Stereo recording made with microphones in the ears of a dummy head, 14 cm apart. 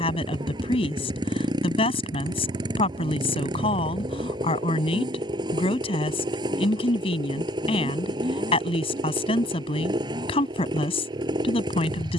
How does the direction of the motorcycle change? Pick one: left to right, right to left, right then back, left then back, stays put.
stays put.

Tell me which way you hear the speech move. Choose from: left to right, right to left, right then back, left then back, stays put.
stays put.